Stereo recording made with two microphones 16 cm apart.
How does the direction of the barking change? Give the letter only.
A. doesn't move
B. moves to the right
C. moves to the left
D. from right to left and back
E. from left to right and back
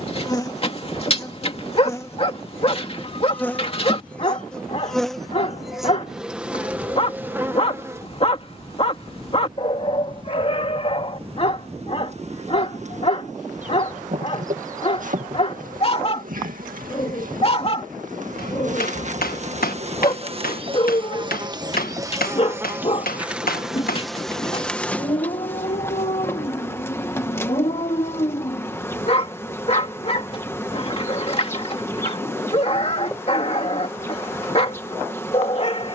A.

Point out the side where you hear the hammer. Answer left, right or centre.
left.